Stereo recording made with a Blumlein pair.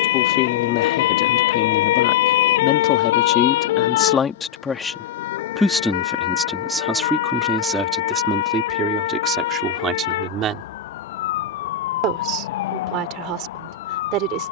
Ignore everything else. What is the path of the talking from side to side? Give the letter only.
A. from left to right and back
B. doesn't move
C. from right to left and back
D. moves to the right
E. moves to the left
D.